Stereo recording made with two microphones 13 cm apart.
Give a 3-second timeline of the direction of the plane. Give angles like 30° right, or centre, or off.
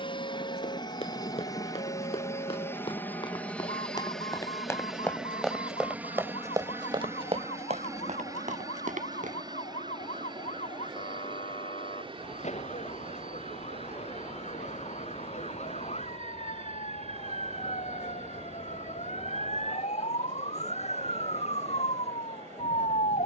30° left, centre, 20° right, 30° right, 40° right, 50° right, 50° right, 50° right.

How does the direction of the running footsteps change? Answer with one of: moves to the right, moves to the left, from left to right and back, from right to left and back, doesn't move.
moves to the right.